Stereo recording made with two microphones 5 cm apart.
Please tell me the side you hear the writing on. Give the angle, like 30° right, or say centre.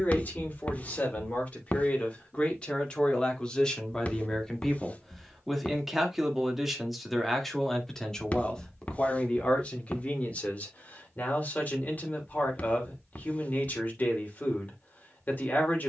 30° left.